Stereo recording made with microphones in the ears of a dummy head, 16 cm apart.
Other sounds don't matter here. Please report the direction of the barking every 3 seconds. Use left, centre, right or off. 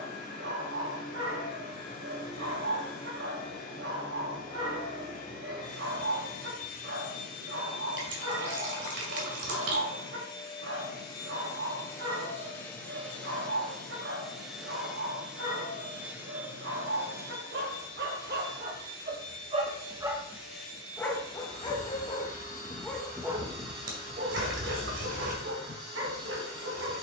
right, right, right, right, right, right, right, centre, right.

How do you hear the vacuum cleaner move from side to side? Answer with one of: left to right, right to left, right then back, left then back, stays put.
left to right.